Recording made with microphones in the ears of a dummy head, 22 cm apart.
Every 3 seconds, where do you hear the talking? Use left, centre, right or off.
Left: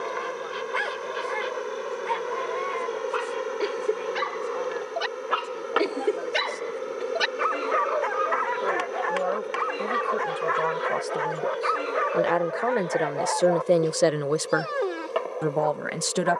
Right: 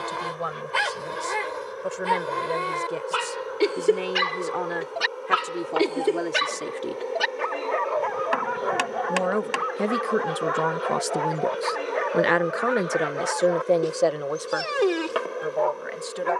right, right, right, right, centre, left.